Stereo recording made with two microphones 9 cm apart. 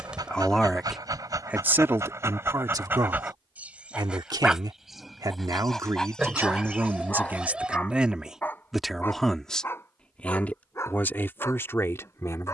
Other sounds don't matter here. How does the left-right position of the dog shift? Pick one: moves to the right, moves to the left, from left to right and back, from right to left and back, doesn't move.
moves to the left.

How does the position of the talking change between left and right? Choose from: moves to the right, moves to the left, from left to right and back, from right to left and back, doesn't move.
from left to right and back.